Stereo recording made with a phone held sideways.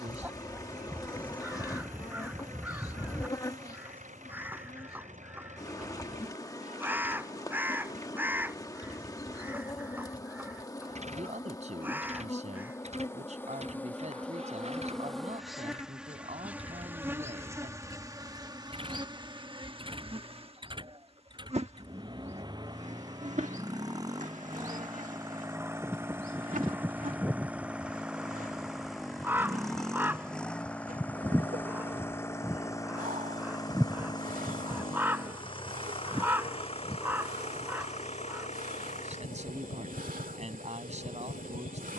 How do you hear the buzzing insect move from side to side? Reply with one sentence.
You can hear the buzzing insect move to the right.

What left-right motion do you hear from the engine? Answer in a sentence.
In this clip you hear the engine travel towards the left.